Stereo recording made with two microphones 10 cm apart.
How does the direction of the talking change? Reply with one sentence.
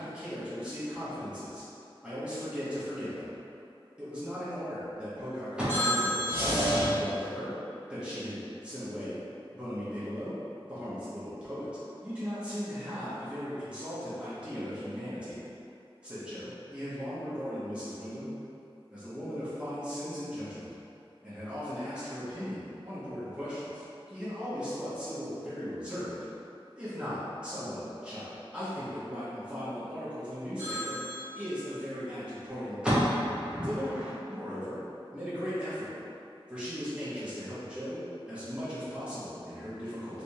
You can hear the talking stay in one place.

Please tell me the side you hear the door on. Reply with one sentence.
In this clip you hear the door in the centre.